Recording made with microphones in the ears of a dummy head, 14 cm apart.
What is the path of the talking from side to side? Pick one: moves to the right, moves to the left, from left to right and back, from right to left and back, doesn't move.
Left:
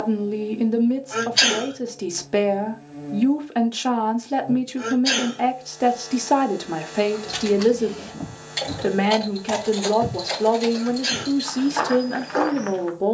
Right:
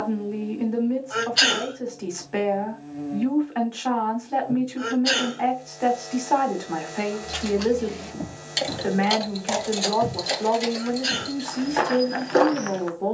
doesn't move.